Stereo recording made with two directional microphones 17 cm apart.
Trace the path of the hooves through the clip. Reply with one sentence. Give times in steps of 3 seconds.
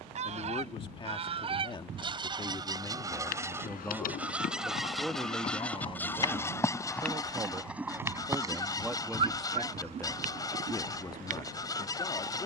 In this clip you hear the hooves not at all from 0 s, on the left from 3 s, in the centre from 6 s and on the right from 9 s.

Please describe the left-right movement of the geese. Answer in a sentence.
You can hear the geese go from the right side to the left.